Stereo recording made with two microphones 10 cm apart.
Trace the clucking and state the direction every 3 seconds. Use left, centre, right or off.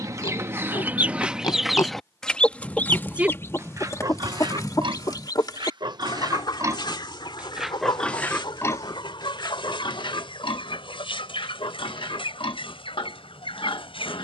centre, left, left, left, left.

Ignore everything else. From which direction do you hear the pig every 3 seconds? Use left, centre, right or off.
left, right, centre, left, left.